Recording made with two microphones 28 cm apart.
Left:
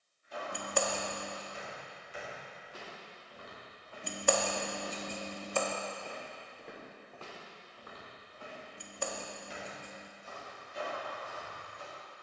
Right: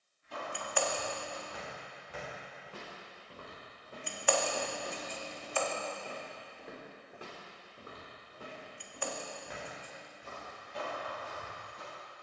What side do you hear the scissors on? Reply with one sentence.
You can hear the scissors on the left.